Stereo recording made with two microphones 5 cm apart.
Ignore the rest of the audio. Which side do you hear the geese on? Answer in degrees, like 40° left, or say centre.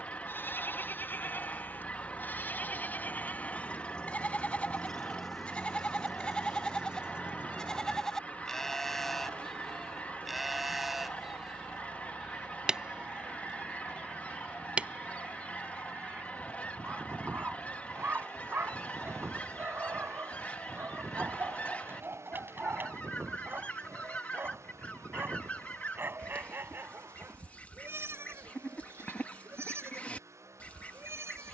30° left.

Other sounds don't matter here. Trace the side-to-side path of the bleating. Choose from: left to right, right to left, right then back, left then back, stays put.
left to right.